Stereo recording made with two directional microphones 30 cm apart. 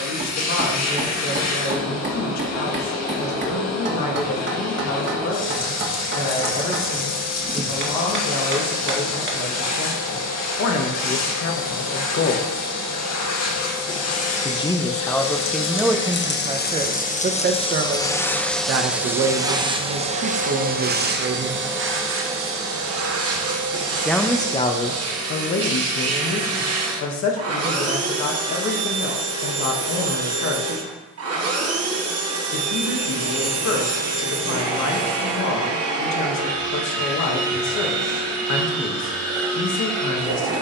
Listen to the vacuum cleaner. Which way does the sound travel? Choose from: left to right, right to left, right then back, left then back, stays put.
left to right.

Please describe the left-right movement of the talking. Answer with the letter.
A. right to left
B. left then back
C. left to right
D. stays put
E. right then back
E.